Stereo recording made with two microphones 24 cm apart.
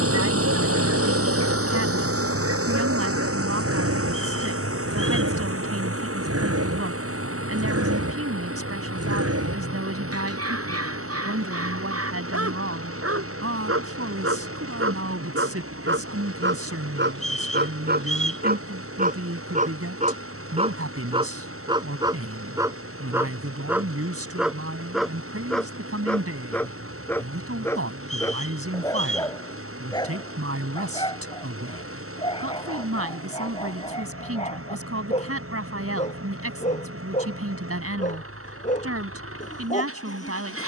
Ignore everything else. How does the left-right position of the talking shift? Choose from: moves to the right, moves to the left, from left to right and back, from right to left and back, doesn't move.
doesn't move.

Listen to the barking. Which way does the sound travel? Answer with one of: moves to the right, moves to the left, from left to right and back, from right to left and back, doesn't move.
moves to the left.